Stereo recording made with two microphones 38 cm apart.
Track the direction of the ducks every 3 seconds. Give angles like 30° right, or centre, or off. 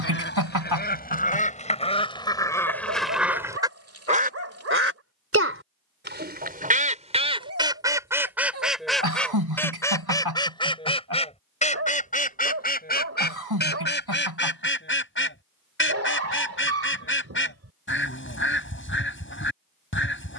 20° left, 20° right, 10° right, 10° left, 30° left, 30° left, 30° left.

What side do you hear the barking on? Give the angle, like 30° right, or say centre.
40° right.